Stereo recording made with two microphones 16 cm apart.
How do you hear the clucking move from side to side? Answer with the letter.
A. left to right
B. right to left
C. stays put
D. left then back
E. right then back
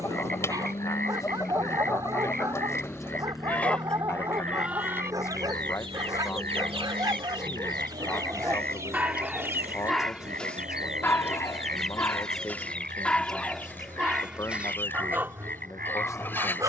E.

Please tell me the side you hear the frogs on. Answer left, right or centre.
right.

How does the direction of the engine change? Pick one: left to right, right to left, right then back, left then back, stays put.
left to right.